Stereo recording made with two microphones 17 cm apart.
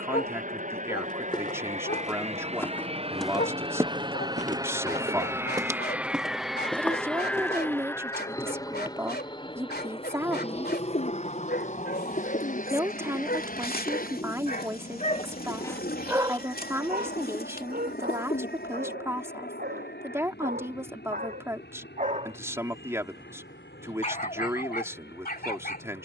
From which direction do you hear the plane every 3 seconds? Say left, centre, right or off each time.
right, right, centre, left, left, left, left, left, left.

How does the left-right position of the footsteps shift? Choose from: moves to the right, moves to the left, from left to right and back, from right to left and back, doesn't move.
from left to right and back.